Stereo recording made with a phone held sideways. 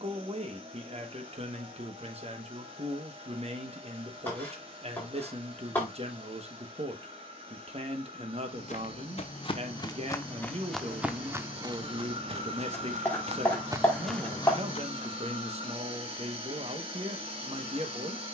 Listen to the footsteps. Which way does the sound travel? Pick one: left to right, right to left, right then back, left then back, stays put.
right then back.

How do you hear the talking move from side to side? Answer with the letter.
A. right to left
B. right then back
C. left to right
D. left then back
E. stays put
E.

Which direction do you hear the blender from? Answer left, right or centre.
right.